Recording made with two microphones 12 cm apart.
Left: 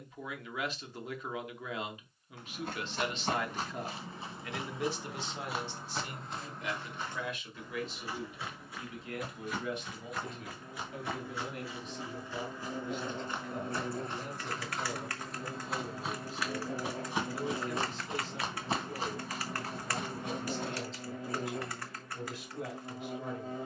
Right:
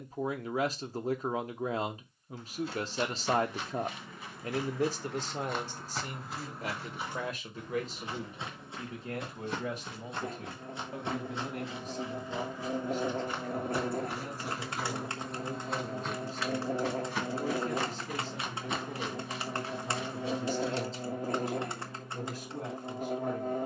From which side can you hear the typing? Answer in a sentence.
You can hear the typing on the right.